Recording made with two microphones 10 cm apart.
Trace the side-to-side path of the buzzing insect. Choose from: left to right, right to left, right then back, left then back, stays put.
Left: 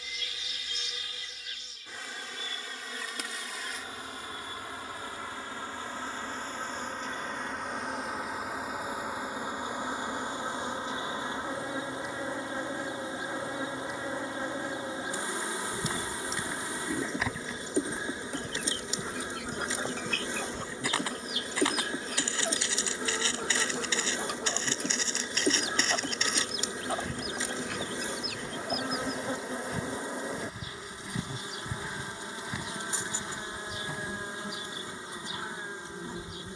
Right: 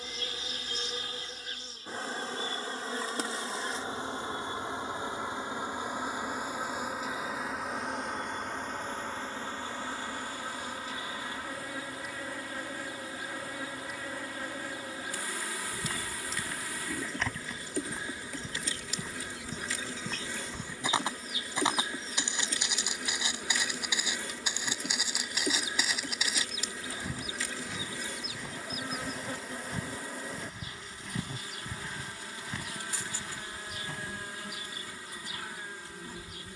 right to left.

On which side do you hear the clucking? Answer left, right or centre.
left.